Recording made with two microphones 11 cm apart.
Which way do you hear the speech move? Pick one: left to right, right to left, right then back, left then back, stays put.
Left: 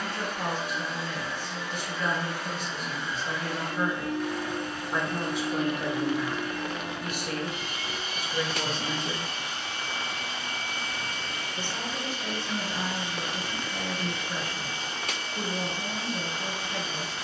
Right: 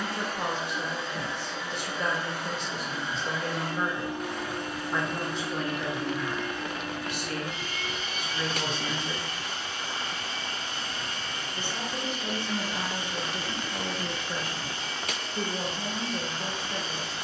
left then back.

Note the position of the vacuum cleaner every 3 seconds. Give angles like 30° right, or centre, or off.
20° right, 10° right, 30° left, 50° left, 50° left, 50° left.